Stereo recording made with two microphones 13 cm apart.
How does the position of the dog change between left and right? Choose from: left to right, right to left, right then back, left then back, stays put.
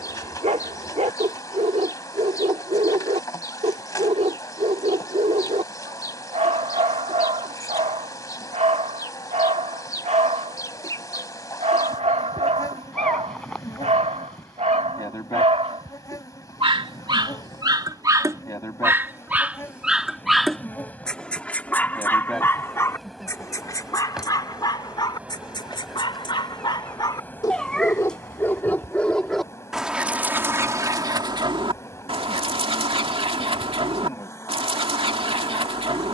left then back.